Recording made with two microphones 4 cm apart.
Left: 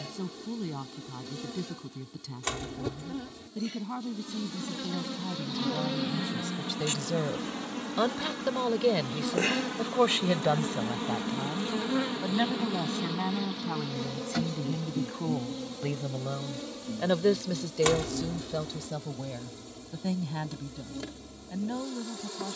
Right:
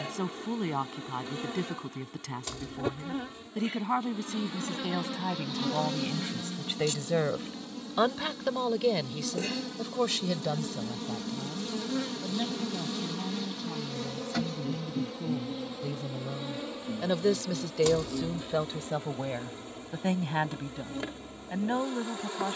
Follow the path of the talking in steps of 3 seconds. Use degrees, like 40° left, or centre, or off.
60° right, 60° right, 20° right, 40° left, 70° left, 30° left, 40° right, 50° right.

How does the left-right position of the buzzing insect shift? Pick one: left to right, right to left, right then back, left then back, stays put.
left then back.